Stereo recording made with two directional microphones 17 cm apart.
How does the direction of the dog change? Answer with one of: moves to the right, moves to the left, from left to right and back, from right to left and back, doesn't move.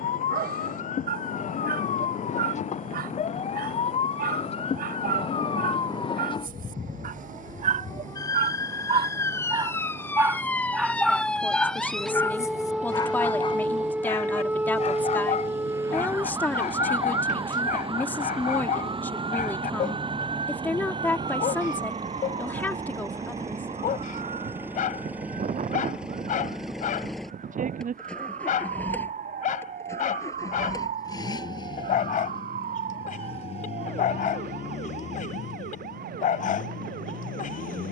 moves to the left.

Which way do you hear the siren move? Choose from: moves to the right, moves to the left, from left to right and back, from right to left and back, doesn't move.
moves to the right.